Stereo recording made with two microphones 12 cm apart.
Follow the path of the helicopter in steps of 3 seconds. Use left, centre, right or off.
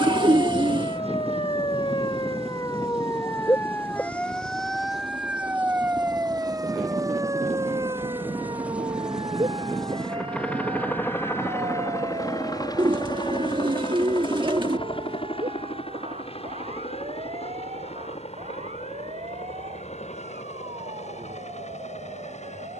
right, right, right, centre, left, left, left, left.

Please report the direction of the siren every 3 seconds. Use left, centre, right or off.
left, centre, right, right, right, right, right, right.